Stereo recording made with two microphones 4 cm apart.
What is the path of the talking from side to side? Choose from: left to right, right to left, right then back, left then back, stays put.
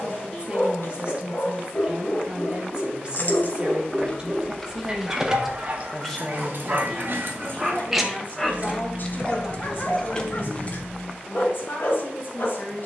right to left.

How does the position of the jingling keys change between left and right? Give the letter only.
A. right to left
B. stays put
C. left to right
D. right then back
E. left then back
D.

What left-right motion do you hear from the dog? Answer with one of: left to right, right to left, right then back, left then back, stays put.
right then back.